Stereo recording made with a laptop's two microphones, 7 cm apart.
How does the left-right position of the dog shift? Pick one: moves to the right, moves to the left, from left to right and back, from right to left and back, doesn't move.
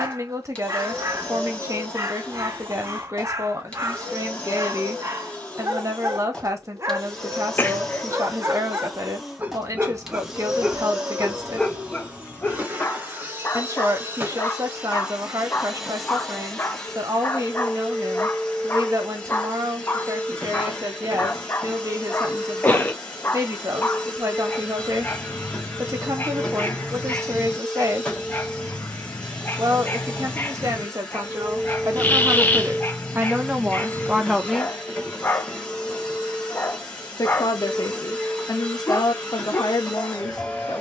moves to the left.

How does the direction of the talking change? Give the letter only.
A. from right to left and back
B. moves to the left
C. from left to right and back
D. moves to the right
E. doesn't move
B.